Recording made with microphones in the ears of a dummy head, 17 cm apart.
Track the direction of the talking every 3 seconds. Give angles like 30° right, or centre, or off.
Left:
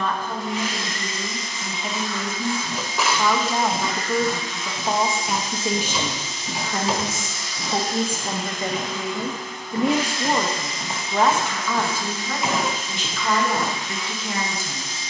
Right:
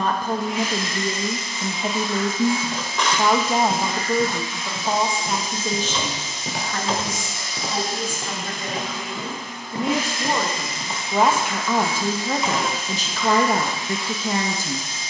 30° right, centre, 20° left, centre, 30° right.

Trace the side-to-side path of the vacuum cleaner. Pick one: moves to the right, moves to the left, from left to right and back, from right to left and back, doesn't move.
doesn't move.